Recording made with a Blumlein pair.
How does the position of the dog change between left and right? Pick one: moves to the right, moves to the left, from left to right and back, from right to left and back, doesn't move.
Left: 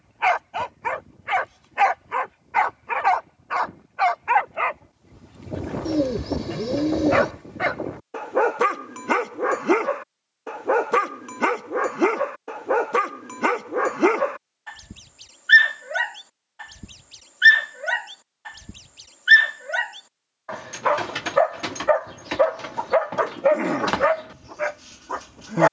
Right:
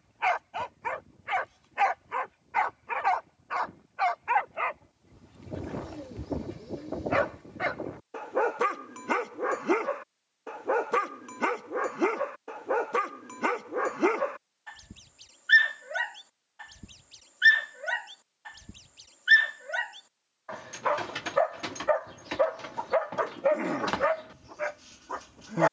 doesn't move.